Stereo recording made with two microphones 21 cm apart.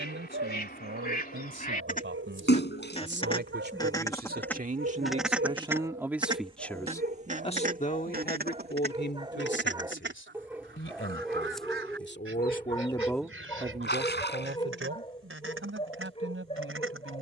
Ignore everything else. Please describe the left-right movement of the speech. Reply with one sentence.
In this clip you hear the speech move from right to left and back again.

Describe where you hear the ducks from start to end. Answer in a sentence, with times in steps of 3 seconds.
In this clip you hear the ducks on the left from 0 s, in the centre from 3 s and on the right from 6 s.